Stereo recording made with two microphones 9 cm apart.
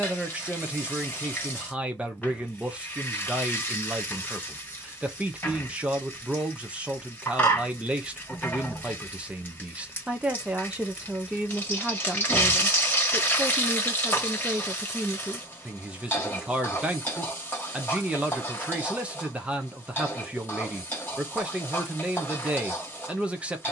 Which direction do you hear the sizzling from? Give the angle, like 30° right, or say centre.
20° left.